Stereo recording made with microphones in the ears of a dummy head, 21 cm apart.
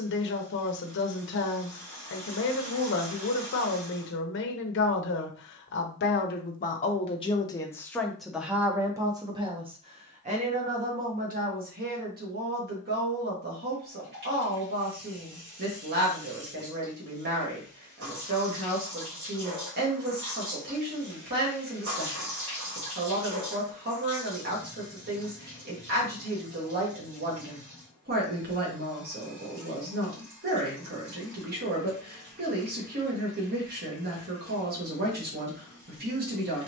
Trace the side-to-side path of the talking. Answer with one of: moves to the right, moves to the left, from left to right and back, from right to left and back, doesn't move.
moves to the right.